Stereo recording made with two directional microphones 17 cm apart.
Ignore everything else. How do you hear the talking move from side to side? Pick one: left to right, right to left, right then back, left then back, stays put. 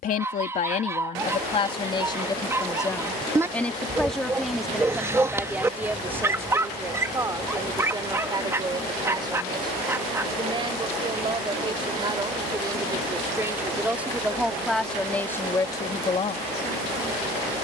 right then back.